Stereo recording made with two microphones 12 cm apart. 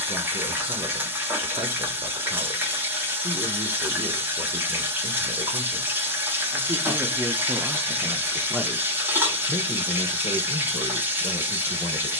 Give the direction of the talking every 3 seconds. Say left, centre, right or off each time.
right, right, centre, left.